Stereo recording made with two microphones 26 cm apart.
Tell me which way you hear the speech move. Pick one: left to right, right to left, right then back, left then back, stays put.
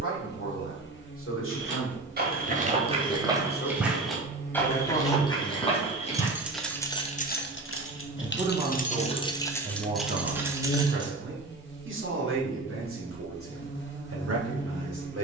left to right.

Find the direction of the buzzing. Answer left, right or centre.
left.